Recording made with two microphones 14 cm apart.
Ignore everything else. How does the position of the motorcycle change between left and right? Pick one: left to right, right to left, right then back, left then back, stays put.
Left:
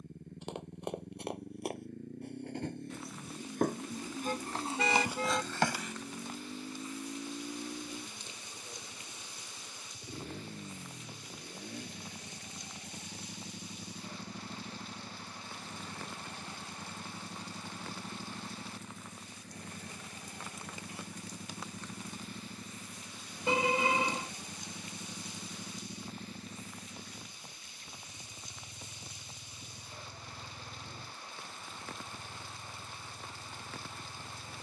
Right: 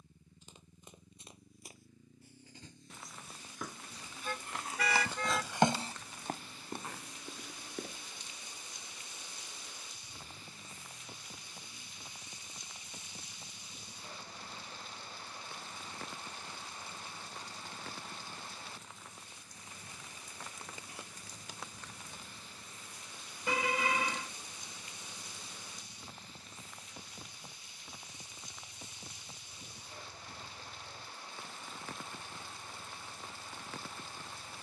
stays put.